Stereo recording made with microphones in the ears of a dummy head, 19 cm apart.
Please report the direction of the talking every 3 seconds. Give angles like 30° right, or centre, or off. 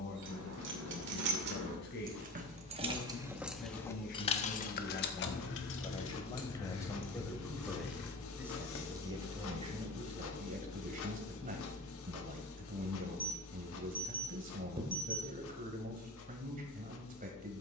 50° left, 40° left, centre, 30° right, 40° right, 40° right.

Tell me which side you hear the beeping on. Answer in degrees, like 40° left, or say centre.
20° right.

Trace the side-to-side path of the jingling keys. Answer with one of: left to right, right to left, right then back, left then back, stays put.
right to left.